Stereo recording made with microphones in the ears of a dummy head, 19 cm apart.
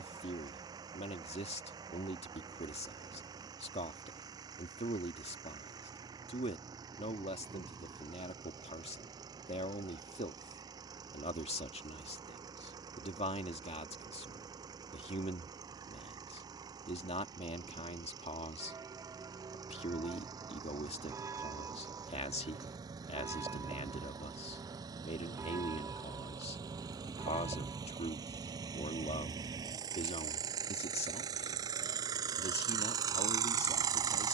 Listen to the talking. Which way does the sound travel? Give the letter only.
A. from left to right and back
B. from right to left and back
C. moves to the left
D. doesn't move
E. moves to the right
D.